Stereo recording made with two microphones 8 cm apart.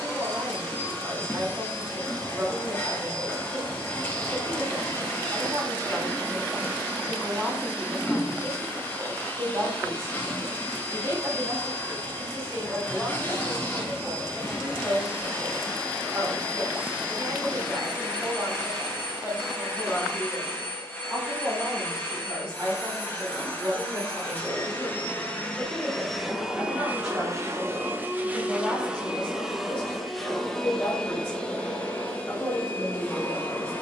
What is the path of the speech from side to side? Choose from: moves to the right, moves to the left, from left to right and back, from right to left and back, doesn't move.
moves to the left.